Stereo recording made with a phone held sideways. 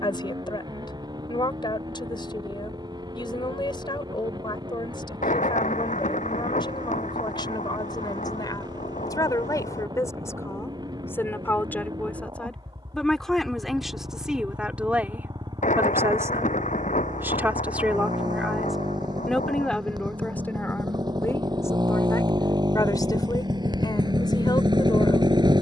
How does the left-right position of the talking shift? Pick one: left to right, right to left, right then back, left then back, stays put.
right then back.